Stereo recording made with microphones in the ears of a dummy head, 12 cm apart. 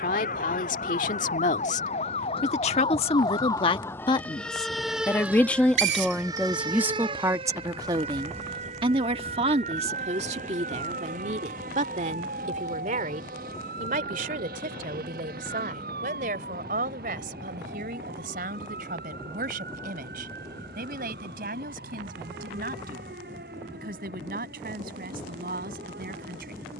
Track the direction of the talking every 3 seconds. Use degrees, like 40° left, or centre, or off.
60° left, 30° left, 20° right, 50° right, 60° right, 70° right, 70° right, 70° right, 70° right.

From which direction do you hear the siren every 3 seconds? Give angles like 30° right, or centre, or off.
50° left, centre, 40° right, 60° right, 70° right, 70° right, 70° right, 70° right, 80° right.